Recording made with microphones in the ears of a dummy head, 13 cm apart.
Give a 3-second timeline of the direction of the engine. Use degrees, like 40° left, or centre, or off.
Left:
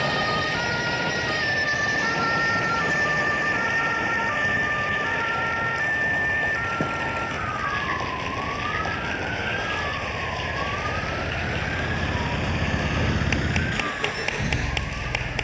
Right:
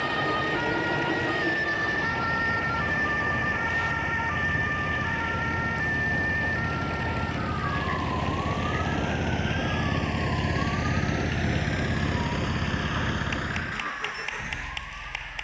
70° right, 70° right, 60° right, 40° right, 20° left.